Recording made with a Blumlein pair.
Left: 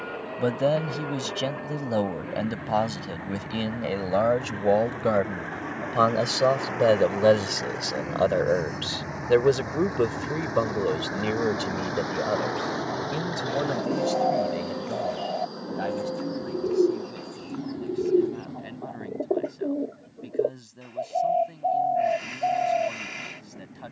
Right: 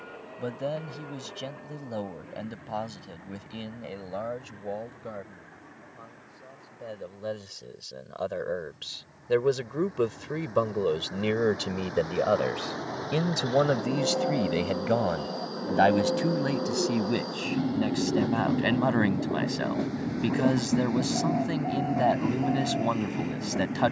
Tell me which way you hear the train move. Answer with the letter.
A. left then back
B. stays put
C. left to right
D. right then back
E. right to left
C.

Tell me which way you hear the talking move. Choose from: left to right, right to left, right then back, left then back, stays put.
left to right.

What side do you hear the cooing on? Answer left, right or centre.
left.